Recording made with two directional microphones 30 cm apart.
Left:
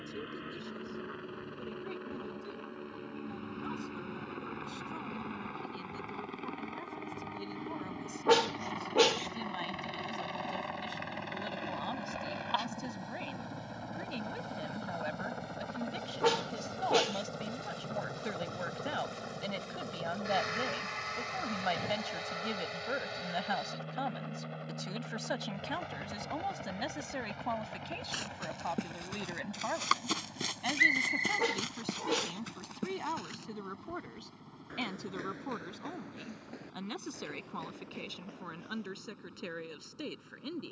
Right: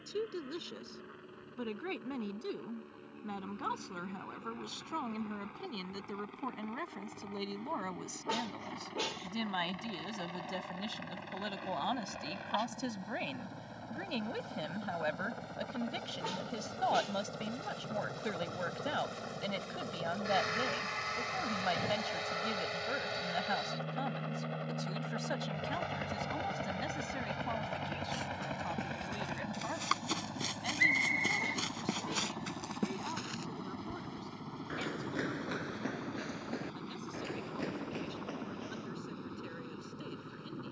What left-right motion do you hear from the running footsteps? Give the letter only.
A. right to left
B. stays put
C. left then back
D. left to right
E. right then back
D.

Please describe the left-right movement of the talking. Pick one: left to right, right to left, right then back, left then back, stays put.
right to left.